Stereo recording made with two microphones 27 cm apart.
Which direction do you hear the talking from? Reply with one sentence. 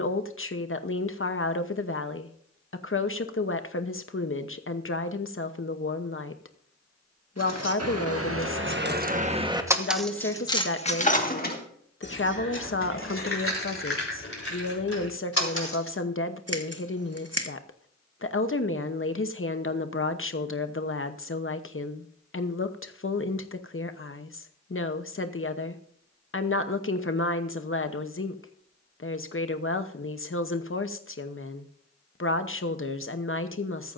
In this clip you hear the talking on the left.